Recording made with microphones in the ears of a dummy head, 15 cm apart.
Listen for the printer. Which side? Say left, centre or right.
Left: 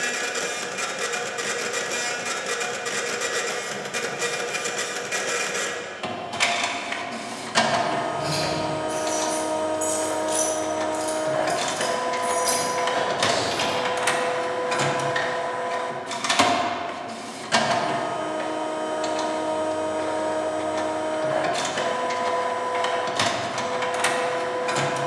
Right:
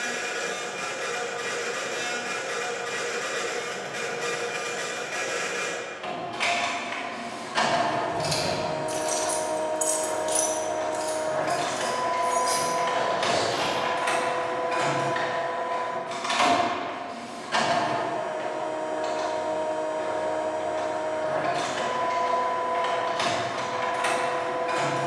left.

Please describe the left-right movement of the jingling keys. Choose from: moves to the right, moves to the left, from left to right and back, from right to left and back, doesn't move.
moves to the left.